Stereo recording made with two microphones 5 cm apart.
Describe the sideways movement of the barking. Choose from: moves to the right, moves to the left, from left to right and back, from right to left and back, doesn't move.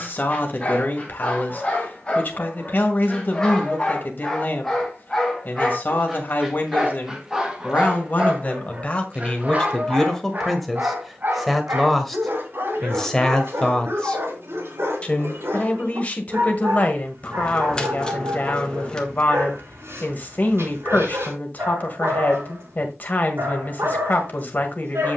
moves to the right.